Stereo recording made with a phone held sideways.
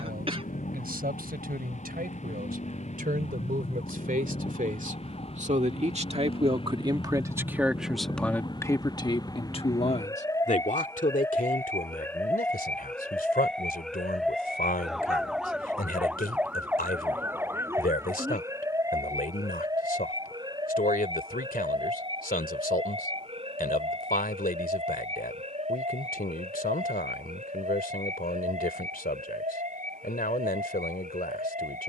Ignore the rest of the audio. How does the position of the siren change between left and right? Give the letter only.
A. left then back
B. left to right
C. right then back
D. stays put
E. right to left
B.